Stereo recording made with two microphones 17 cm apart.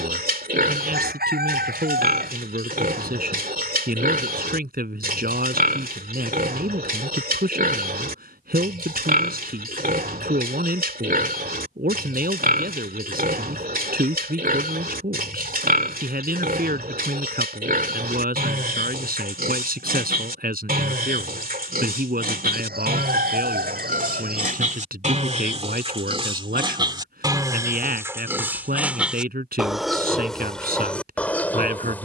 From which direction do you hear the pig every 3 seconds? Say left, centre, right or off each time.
right, right, right, right, right, right, right, right, right, centre, centre.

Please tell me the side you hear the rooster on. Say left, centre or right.
right.